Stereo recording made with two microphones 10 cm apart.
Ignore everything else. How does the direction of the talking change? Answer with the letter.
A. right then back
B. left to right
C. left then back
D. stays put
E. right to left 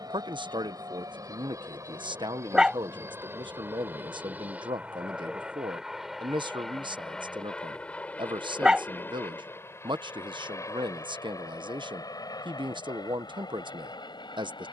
D.